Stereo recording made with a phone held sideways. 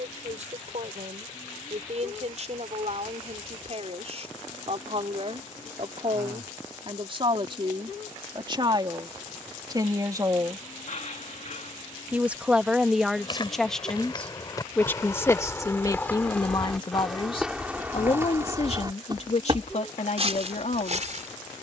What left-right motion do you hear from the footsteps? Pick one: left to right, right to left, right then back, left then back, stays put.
left to right.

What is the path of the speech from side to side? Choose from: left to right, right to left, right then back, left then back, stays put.
right to left.